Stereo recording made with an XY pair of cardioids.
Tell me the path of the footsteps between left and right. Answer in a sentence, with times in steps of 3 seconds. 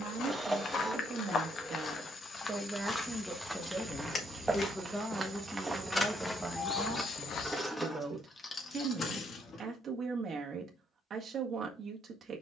In this clip you hear the footsteps on the left from 0 s, in the centre from 3 s, on the left from 6 s and not at all from 9 s.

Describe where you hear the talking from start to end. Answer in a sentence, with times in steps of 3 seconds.
In this clip you hear the talking on the right from 0 s, in the centre from 3 s and on the right from 6 s.